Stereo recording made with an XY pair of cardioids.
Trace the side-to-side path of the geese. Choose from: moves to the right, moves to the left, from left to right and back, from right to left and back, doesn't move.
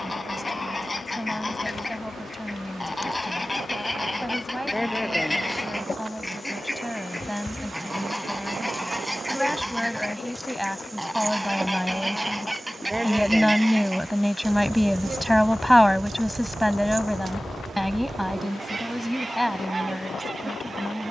moves to the right.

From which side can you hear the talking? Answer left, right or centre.
centre.